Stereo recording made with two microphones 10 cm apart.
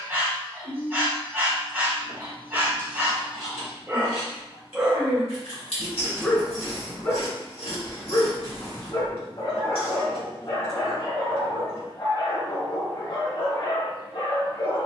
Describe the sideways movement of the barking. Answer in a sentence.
In this clip you hear the barking move to the left.